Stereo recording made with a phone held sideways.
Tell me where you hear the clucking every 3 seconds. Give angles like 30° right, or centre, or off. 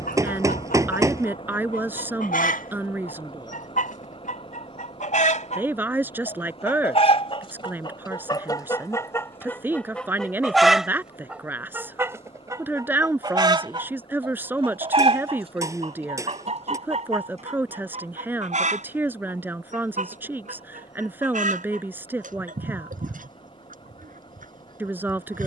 70° left, 60° left, 30° left, centre, 30° right, 50° right, 50° right, 60° right, 60° right.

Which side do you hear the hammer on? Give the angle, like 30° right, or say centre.
20° right.